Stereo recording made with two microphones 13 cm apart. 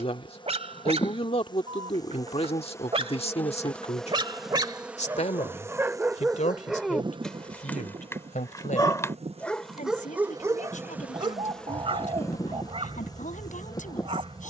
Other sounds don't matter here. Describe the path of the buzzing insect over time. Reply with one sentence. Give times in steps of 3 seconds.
You can hear the buzzing insect on the left from 0 s, in the centre from 3 s, on the right from 6 s and on the left from 12 s.